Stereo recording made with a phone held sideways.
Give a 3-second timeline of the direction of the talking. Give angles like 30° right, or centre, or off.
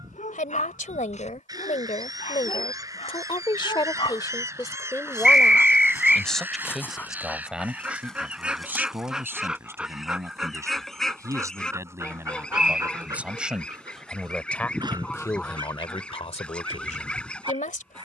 60° left, 30° left, 10° right, 20° right, centre, 50° left.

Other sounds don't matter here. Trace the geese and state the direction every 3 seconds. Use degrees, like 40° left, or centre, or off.
30° right, 20° right, 10° right, centre, 10° left, 10° left.